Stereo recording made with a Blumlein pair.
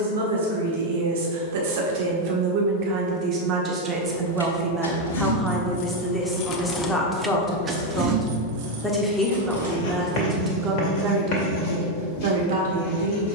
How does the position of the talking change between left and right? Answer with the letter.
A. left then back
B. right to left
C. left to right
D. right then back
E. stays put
A.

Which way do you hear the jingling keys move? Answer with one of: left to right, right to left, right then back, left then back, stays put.
left to right.